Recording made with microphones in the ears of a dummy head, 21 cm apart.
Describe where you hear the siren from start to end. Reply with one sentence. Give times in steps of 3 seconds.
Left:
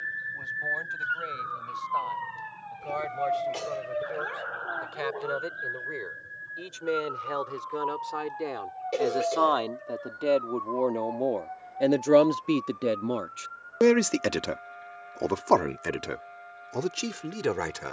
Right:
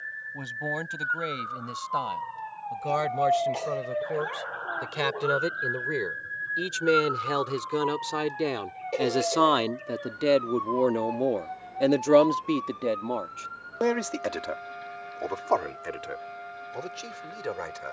In this clip you hear the siren on the left from 0 s, in the centre from 3 s and on the right from 6 s.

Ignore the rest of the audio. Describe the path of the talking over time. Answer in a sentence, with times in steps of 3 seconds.
In this clip you hear the talking on the right from 0 s and on the left from 12 s.